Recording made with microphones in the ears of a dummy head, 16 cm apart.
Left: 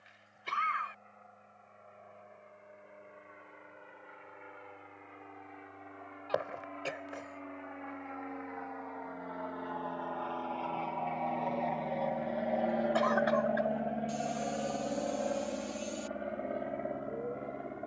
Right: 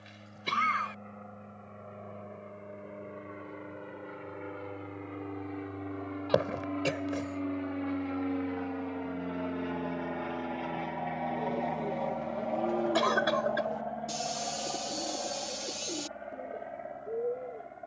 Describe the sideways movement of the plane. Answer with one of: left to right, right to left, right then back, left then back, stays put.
right to left.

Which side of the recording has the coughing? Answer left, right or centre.
right.